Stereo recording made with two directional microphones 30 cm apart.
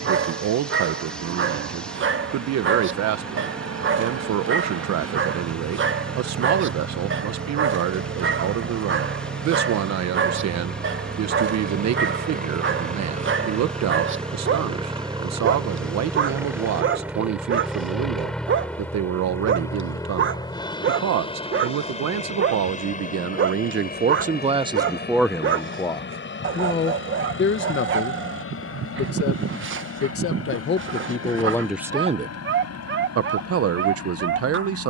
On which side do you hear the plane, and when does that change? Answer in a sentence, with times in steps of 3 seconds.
You can hear the plane on the right from 0 s, in the centre from 15 s and on the left from 21 s.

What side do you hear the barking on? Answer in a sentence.
You can hear the barking on the right.